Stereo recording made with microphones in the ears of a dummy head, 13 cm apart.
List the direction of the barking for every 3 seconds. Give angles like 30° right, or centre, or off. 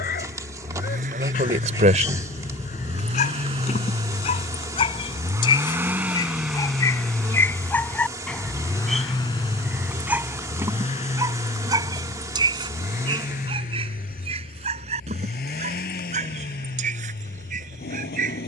50° left, 40° left, 10° left, 10° right, 40° right, 50° right.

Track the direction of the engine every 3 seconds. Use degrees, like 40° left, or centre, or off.
50° right, 30° right, 10° left, 40° left, 50° left, 60° left.